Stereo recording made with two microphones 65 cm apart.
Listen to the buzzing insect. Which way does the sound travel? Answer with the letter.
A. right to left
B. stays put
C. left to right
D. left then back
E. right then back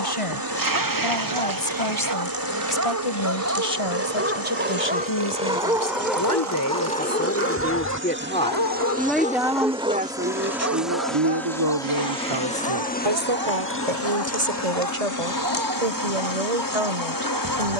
A.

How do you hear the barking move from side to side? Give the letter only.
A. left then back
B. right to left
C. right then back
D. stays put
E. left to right
A.